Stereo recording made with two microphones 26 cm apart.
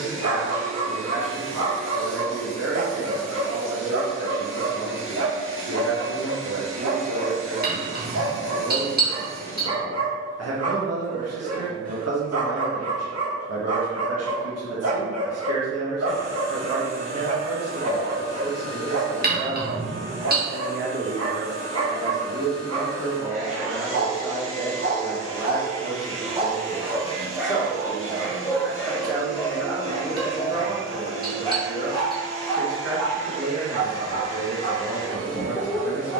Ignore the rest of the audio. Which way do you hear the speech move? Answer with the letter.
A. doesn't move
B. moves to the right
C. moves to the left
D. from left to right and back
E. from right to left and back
E.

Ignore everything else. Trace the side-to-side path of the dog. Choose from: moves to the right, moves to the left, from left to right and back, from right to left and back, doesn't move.
moves to the left.